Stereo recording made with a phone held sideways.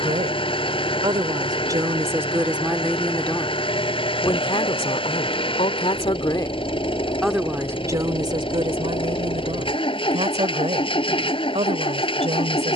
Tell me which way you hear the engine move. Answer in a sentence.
You can hear the engine stay put.